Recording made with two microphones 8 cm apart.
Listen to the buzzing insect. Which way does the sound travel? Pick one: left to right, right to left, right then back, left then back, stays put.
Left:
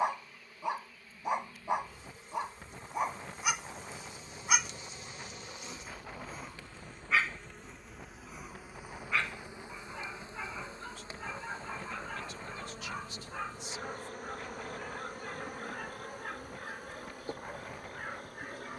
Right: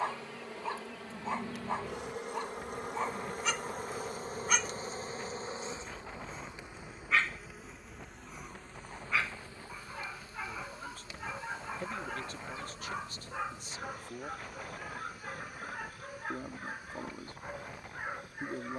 right to left.